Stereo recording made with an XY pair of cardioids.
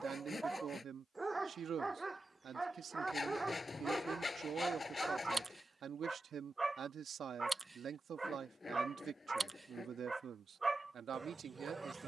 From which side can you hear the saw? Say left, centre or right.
left.